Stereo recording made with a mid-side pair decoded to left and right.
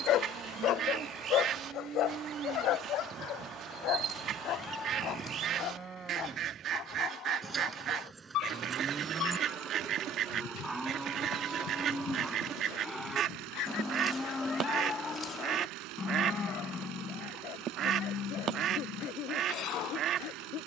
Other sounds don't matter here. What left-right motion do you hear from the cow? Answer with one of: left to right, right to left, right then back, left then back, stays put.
right to left.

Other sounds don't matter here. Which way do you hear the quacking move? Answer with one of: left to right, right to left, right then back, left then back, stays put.
stays put.